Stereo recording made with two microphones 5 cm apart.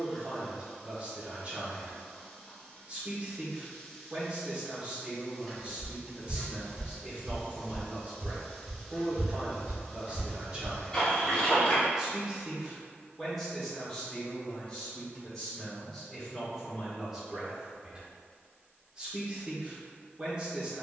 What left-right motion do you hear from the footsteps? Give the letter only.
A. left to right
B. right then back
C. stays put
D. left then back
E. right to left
B.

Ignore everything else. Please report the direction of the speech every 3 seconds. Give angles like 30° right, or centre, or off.
30° right, 30° right, 30° right, 30° right, centre, centre, 20° right.